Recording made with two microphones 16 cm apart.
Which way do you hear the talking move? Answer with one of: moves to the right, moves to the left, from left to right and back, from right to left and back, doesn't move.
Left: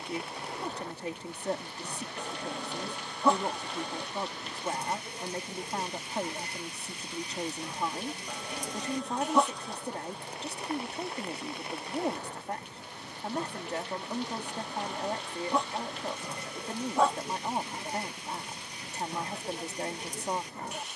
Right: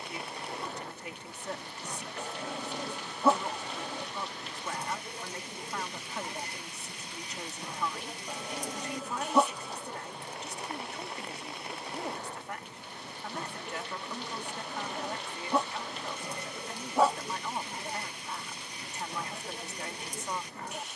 doesn't move.